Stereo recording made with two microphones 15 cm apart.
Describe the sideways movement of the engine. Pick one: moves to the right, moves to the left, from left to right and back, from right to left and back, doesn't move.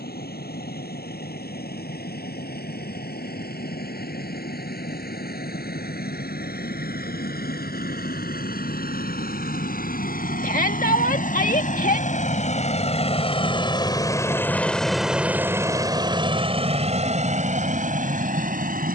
moves to the right.